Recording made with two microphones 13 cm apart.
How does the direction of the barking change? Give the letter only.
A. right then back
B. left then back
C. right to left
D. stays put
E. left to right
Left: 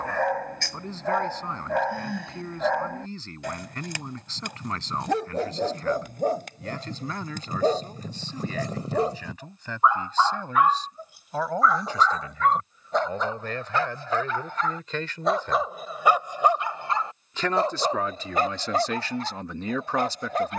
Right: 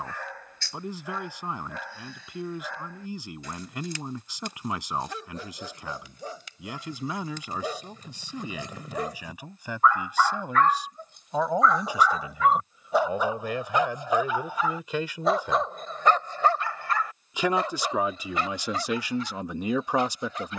A.